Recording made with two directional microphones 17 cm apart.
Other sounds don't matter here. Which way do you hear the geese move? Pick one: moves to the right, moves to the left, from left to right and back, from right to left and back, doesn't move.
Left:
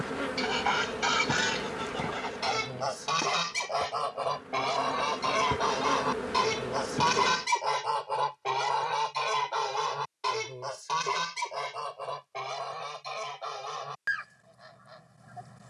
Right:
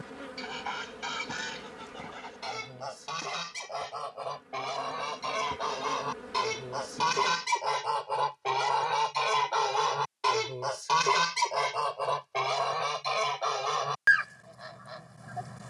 moves to the right.